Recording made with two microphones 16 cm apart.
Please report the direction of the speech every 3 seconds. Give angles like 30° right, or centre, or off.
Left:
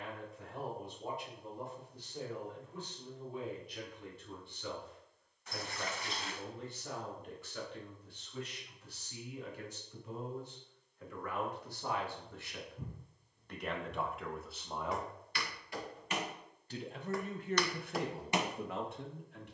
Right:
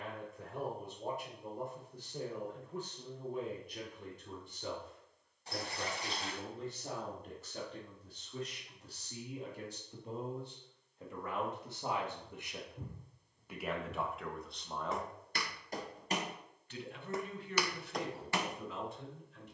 50° right, 50° right, 40° right, 30° right, centre, 40° left, 60° left.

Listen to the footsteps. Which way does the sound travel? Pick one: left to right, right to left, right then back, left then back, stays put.
right to left.